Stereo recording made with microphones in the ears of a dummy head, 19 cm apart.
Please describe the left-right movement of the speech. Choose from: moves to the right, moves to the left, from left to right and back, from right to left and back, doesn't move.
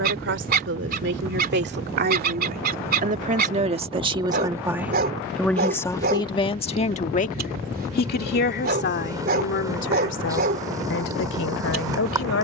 moves to the left.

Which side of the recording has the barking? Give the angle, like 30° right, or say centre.
40° right.